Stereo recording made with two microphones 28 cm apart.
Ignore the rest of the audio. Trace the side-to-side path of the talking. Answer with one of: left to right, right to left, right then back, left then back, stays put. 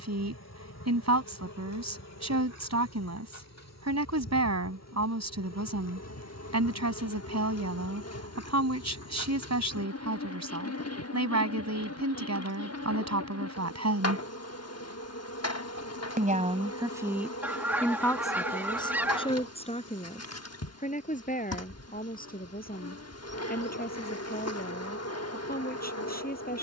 right to left.